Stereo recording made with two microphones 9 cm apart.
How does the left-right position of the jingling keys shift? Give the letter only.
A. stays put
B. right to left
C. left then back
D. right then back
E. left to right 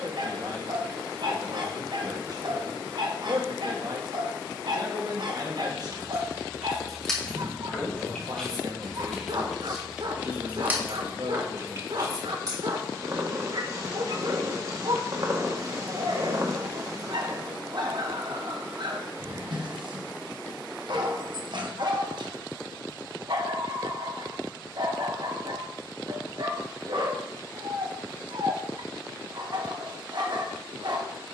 C.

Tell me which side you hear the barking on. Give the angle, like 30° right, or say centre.
60° right.